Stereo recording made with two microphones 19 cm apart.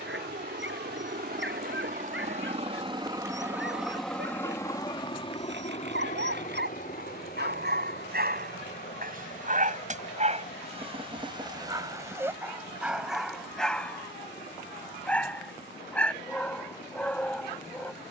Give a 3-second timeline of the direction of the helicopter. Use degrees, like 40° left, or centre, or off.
50° right, 10° left, 50° left, 60° left, 70° left, 70° left.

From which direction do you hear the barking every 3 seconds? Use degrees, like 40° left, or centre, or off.
80° right, 80° right, 60° right, 30° right, centre, 10° left.